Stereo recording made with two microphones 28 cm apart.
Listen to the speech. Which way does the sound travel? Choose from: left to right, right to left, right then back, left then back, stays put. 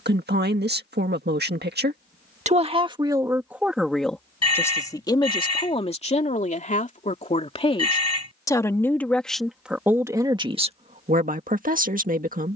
left then back.